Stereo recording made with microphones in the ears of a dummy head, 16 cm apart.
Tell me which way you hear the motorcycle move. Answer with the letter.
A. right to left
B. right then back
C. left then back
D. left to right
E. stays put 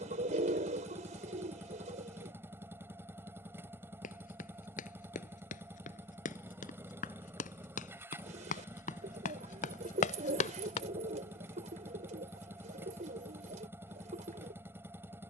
E.